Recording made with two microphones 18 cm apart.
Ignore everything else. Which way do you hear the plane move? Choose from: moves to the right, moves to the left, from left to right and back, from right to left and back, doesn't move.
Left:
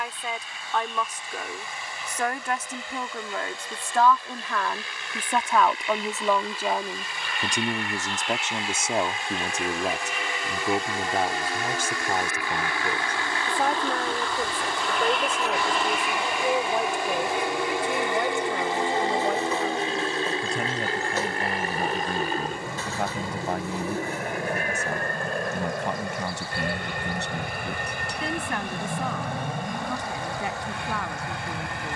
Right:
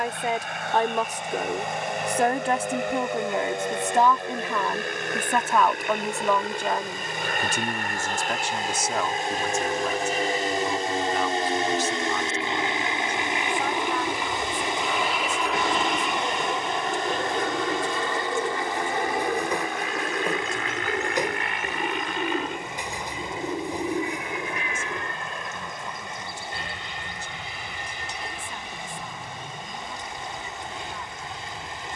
moves to the left.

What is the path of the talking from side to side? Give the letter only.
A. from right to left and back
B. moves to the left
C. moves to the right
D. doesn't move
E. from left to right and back
B.